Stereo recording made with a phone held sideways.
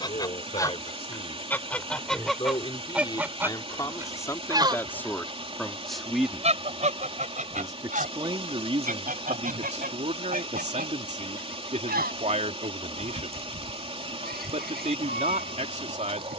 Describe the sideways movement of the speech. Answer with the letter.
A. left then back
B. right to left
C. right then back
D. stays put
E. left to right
E.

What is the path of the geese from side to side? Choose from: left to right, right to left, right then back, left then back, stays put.
left to right.